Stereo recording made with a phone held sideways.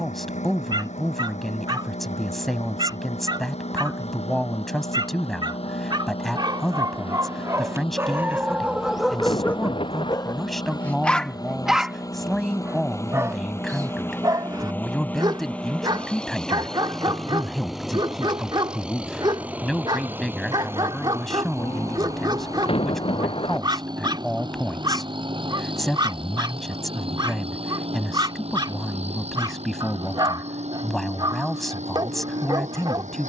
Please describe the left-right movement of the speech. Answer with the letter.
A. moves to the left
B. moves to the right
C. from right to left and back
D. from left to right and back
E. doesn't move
E.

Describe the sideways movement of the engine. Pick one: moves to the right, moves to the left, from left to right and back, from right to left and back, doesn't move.
moves to the right.